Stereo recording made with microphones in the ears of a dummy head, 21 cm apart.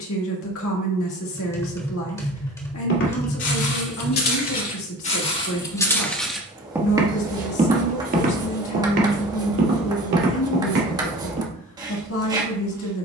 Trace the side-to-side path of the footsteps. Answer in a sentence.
You can hear the footsteps travel towards the right.